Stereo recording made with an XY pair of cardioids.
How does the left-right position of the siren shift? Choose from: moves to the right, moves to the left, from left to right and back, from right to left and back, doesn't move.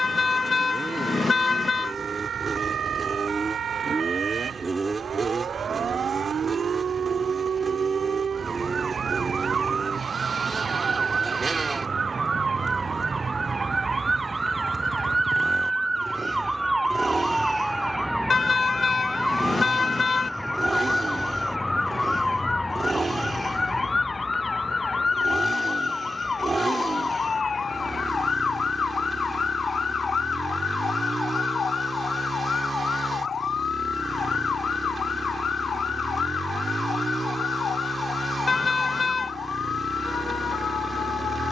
moves to the left.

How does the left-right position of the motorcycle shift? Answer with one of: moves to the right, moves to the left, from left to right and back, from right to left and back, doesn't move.
doesn't move.